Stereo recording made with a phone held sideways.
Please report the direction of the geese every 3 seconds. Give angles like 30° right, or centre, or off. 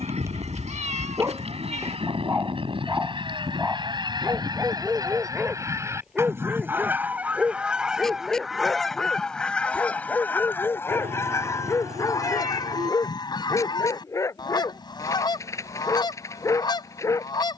50° right, 30° right, 10° right, 10° left, 30° left, 30° left.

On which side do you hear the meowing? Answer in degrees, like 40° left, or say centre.
50° right.